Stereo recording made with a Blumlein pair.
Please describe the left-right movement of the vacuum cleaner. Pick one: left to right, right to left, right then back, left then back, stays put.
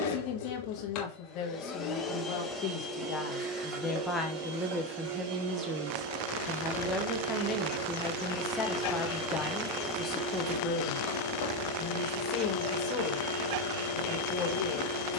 right then back.